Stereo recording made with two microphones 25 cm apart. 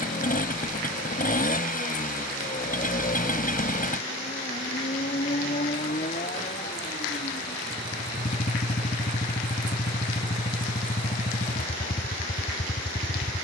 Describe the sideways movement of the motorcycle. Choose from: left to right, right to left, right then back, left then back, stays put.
stays put.